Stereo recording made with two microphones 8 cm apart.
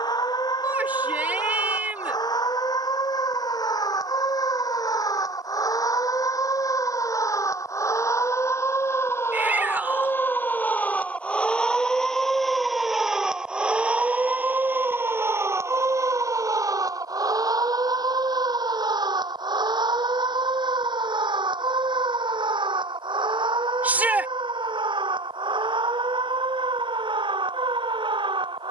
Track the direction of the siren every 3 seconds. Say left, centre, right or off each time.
left, left, left, left, centre, right, right, right, right, right.